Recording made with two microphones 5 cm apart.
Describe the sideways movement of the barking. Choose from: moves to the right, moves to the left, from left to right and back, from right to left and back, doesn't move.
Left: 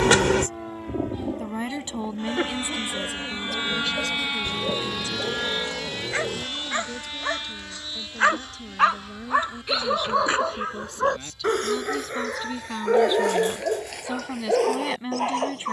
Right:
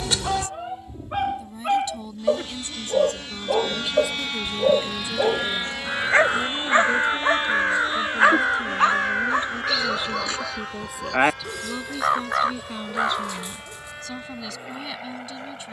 moves to the left.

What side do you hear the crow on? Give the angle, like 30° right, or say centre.
80° right.